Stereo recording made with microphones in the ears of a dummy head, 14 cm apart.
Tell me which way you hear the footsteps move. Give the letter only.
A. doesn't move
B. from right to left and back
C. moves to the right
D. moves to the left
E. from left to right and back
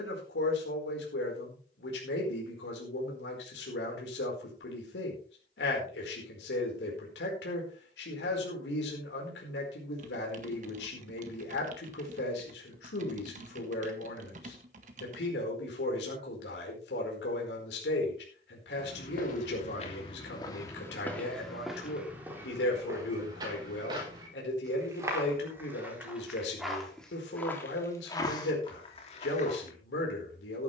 E.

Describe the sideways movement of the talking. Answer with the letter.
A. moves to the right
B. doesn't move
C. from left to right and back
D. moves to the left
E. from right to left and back
B.